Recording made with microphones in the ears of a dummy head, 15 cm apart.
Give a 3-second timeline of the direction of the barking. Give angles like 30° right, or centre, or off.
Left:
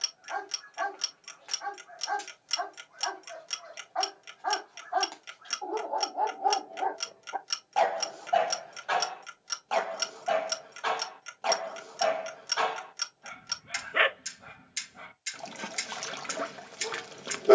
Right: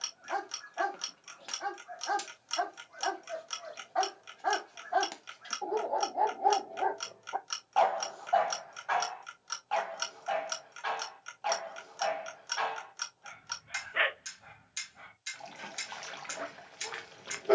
40° right, 30° right, 10° left, 50° left, 50° left, 50° left.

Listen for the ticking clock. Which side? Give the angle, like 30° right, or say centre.
20° left.